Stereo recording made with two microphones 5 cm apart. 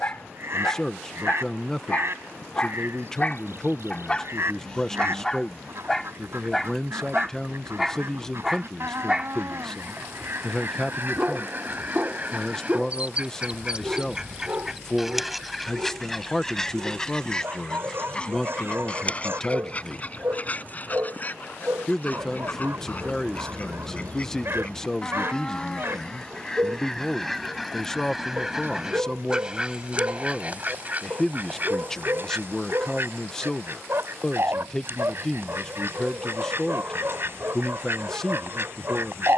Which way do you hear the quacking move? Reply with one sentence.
You can hear the quacking move from right to left and back again.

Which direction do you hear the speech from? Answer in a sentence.
You can hear the speech in the centre.